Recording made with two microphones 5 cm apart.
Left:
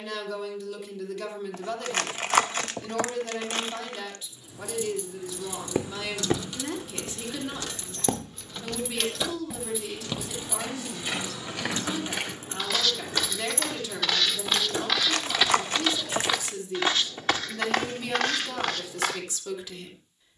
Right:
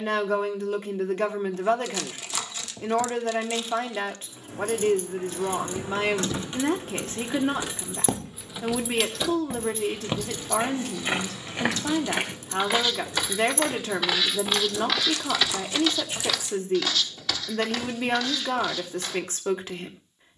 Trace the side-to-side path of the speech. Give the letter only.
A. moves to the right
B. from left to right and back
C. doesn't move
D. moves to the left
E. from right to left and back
C.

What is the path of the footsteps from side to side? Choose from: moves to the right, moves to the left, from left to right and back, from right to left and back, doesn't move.
from left to right and back.